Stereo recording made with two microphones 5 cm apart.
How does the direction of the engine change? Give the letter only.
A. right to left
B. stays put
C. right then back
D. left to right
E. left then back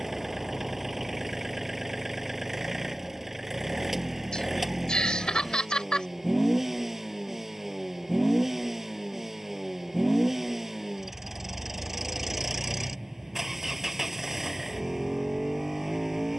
B.